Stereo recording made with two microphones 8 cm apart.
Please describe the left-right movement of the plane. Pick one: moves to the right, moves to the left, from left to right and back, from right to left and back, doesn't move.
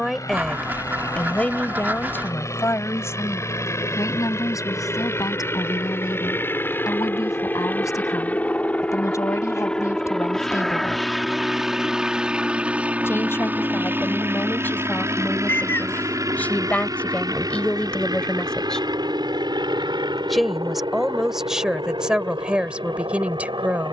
moves to the right.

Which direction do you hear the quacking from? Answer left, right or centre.
right.